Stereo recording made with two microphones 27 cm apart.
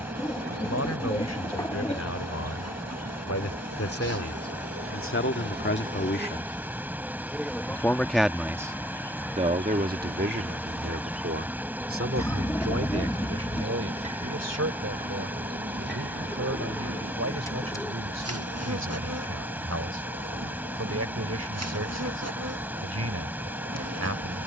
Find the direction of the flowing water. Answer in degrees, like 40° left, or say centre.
10° right.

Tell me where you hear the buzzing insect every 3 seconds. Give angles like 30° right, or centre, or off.
70° right, 50° right, centre, centre, 20° right, 40° right, 60° right, 70° right.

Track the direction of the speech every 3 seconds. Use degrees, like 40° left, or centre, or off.
70° left, 50° left, 10° left, 40° right, 60° right, 70° right, 70° right, 70° right.